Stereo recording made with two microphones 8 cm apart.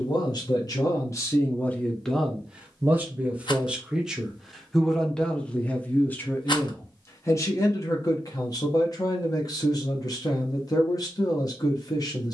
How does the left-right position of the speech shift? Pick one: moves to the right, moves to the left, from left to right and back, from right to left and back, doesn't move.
from left to right and back.